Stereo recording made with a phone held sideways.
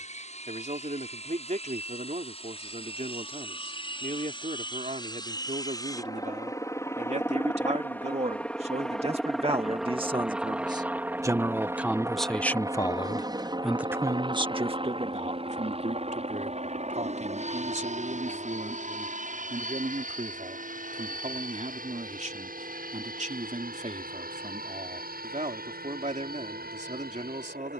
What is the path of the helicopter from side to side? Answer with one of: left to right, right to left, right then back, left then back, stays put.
left to right.